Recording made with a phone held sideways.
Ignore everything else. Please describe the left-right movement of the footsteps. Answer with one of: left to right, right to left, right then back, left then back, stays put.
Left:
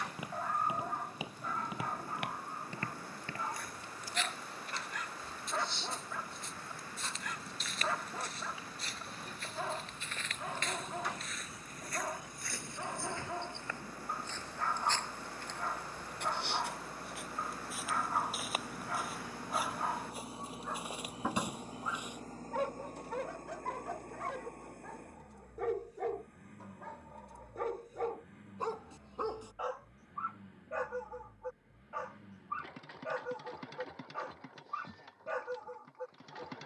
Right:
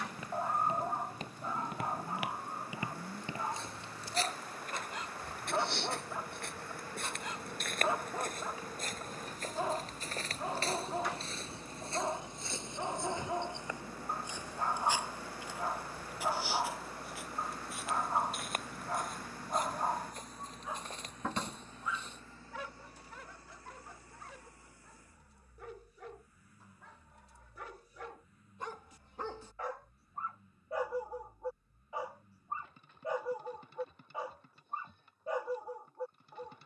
right then back.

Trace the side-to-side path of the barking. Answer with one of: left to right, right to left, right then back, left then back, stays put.
left then back.